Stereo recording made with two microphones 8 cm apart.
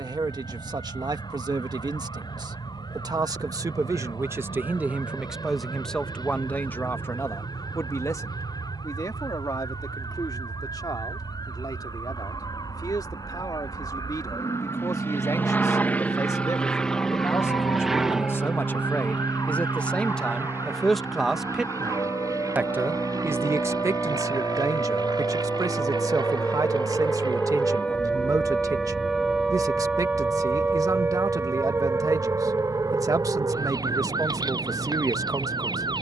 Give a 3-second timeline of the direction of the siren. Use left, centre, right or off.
left, left, left, left, left, left, left, left, left, centre, right, right.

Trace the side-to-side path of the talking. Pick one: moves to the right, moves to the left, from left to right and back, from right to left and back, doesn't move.
from right to left and back.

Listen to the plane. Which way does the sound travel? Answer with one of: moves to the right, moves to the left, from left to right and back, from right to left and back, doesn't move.
moves to the right.